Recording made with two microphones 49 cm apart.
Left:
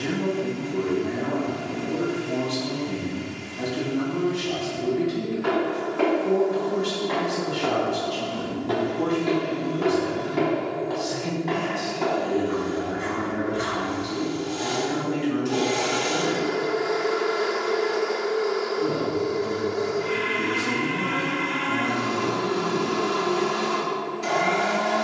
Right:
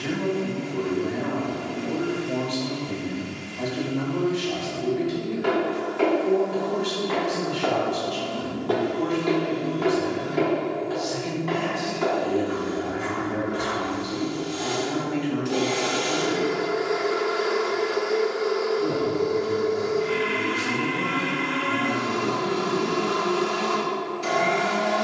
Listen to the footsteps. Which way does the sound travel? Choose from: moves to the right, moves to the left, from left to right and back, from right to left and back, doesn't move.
moves to the right.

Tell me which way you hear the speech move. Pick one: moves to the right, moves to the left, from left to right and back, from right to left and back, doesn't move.
doesn't move.